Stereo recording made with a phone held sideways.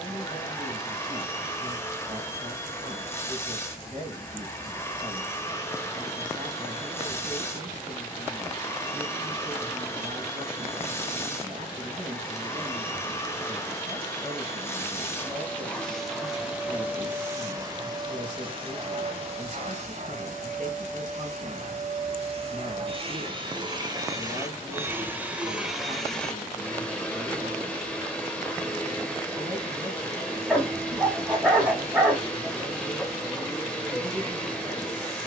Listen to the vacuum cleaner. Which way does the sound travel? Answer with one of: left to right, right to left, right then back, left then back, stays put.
right then back.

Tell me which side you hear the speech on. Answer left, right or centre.
right.